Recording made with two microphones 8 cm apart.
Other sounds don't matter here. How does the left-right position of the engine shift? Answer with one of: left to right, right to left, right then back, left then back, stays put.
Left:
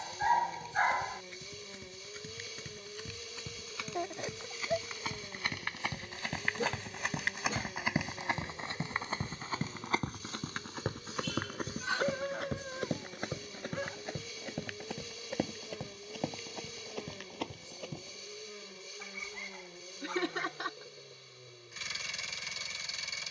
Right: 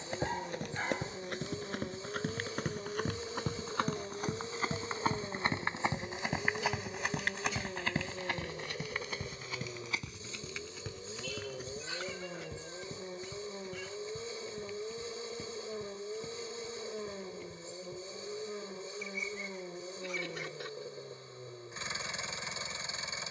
stays put.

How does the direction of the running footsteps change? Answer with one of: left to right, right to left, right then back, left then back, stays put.
right to left.